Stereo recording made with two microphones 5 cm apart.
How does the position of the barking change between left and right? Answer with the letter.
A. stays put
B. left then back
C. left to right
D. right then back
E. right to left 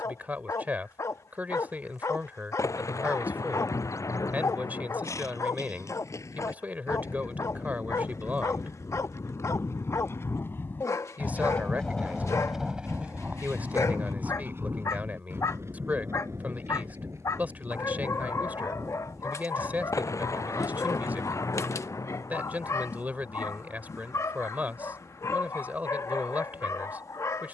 A.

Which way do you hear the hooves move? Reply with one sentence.
You can hear the hooves move from left to right.